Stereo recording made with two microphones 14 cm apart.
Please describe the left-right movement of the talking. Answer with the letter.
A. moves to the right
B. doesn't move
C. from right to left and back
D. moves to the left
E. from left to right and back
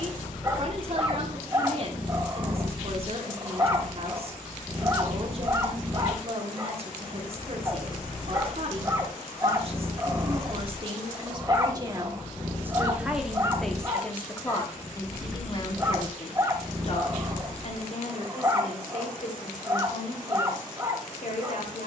D.